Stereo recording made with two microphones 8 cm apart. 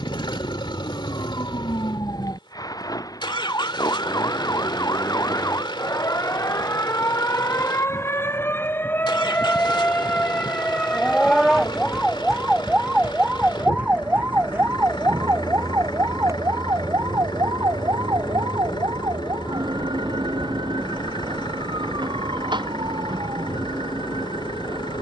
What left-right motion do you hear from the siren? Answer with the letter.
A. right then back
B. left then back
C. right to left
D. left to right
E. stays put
D.